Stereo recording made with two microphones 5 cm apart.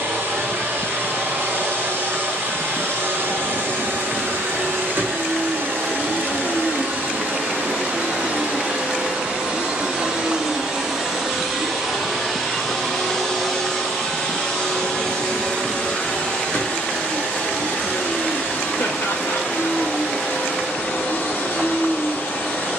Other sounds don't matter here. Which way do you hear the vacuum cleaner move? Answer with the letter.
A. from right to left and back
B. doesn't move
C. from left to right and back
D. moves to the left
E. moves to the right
D.